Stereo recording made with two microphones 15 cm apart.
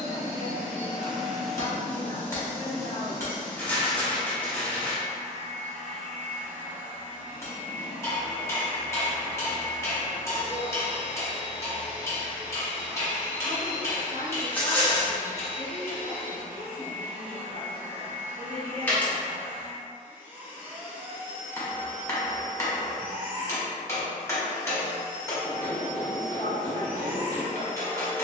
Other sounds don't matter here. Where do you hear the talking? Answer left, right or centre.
left.